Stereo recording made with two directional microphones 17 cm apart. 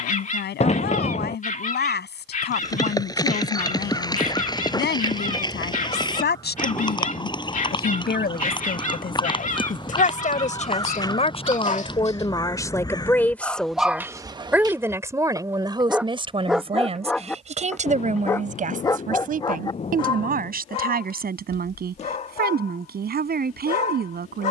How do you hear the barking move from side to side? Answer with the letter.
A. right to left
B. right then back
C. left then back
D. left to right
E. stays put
B.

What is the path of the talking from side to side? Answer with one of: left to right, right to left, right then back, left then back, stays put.
left to right.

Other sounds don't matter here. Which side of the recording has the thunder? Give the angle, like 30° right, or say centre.
40° left.